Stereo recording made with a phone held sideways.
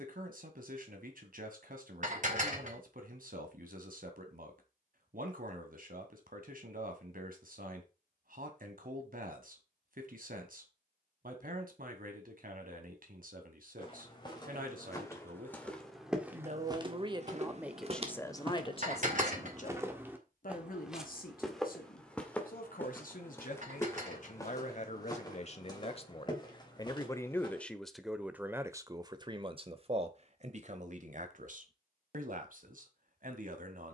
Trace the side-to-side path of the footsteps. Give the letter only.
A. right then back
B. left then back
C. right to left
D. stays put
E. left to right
A.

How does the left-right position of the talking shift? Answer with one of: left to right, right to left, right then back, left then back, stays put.
left then back.